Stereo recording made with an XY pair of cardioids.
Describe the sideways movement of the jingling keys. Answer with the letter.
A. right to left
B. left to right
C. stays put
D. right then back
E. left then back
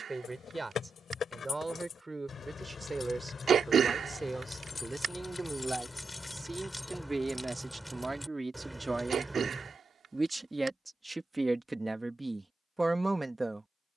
B.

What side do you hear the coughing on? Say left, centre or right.
right.